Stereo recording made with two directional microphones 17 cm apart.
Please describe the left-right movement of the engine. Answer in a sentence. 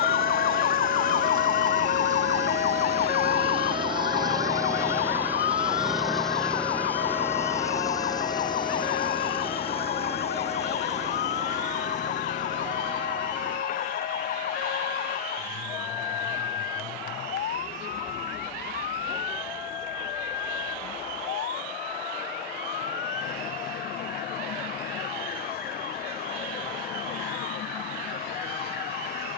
You can hear the engine move from right to left.